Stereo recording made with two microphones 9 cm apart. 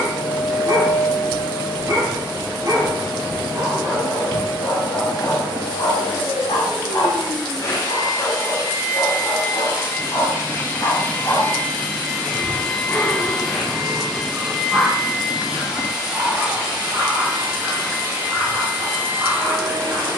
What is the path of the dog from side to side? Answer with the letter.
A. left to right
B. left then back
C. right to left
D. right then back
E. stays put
B.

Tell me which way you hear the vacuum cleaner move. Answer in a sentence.
In this clip you hear the vacuum cleaner go from the left side to the right.